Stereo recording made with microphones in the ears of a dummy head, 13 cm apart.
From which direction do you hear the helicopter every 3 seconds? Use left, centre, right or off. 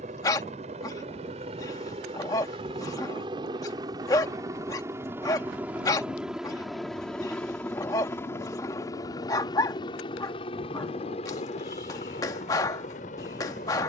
right, right, centre, left, left.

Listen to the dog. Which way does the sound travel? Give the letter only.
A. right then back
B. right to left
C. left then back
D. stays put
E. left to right
D.